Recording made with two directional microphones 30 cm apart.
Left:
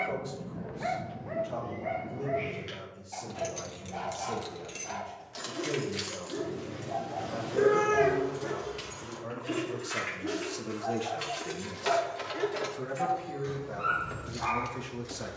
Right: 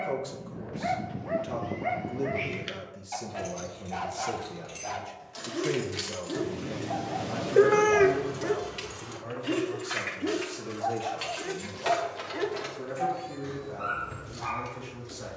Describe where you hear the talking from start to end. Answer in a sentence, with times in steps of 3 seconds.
In this clip you hear the talking on the right from 0 s, in the centre from 9 s and on the left from 12 s.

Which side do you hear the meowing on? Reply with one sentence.
In this clip you hear the meowing on the right.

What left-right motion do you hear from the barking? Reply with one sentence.
You can hear the barking go right and come back.